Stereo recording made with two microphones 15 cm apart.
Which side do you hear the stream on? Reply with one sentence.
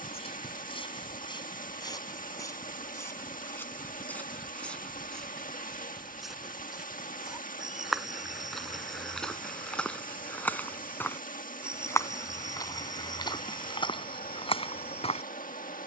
In this clip you hear the stream on the left.